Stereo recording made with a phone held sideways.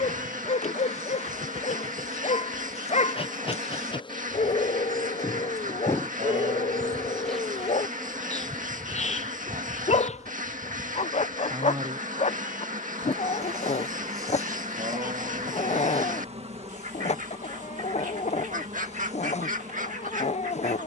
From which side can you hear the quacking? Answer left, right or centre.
right.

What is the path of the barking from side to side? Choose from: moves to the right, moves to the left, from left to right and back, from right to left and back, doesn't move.
doesn't move.